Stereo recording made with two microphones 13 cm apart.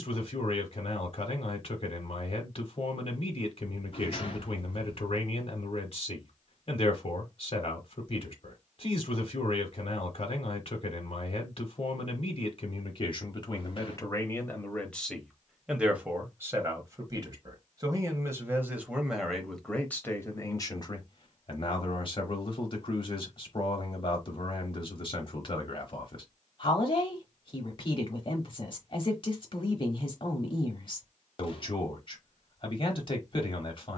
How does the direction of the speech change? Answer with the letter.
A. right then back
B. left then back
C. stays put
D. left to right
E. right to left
A.